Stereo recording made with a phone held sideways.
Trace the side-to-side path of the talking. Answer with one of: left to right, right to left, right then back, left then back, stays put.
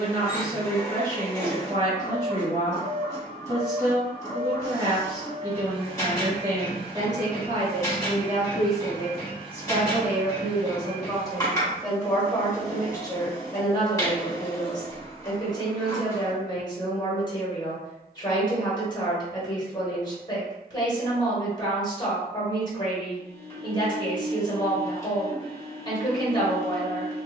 right to left.